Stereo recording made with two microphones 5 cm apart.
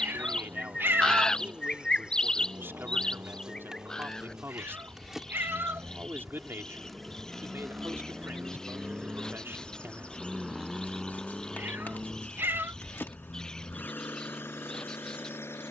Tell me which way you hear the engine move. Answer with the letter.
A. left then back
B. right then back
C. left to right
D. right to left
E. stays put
D.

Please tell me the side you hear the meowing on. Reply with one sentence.
In this clip you hear the meowing on the right.